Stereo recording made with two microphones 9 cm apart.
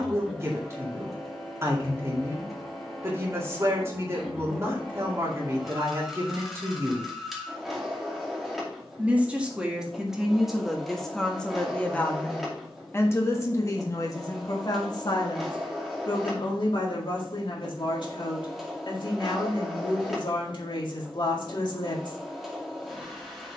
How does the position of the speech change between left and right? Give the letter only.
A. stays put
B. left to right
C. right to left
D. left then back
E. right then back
C.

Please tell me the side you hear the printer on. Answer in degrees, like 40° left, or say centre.
centre.